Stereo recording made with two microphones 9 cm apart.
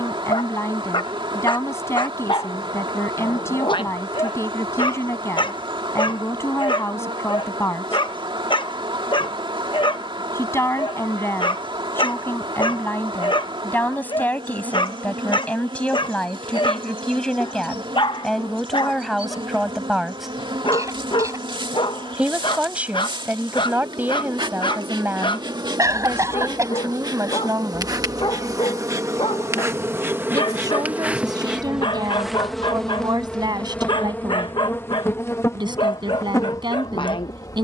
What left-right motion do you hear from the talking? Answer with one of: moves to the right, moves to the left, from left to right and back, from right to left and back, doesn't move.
moves to the right.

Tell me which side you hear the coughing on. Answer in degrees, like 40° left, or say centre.
40° right.